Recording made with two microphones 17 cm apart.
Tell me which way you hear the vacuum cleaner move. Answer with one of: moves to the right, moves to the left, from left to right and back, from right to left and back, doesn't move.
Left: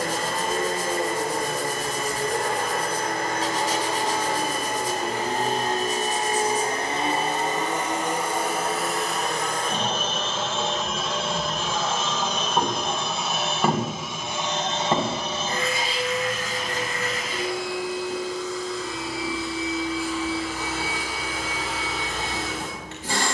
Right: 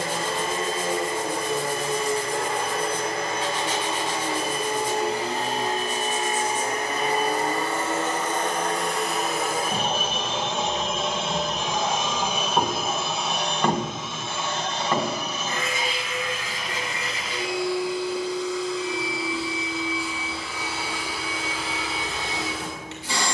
from left to right and back.